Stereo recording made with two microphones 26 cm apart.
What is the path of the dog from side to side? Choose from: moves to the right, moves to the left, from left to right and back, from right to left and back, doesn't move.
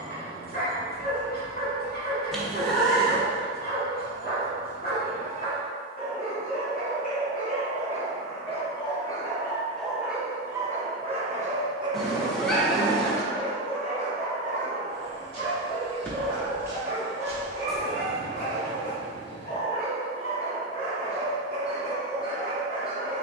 from left to right and back.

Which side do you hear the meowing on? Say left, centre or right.
centre.